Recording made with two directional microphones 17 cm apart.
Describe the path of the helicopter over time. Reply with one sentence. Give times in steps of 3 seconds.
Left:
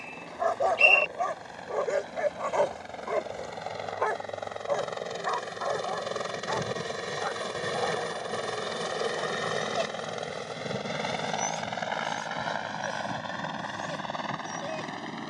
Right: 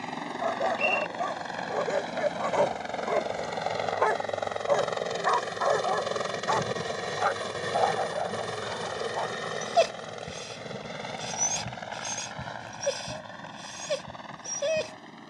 You can hear the helicopter on the right from 0 s, in the centre from 6 s and on the left from 9 s.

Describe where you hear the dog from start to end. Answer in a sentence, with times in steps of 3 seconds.
In this clip you hear the dog in the centre from 0 s and on the right from 3 s.